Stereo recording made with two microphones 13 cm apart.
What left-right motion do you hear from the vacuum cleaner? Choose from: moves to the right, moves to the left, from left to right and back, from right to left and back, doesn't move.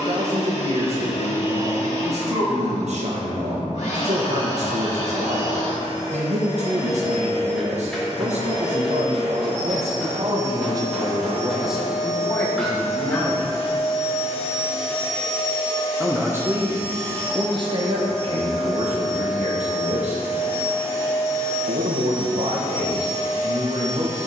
moves to the right.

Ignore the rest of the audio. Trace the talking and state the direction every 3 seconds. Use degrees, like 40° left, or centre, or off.
60° right, 60° right, 60° right, 40° right, 20° left, 30° right, 60° right, 60° right.